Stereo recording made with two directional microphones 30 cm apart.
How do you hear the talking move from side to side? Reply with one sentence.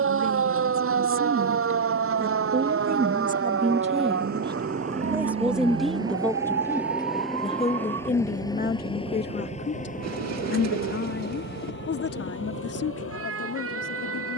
In this clip you hear the talking go from the right side to the left.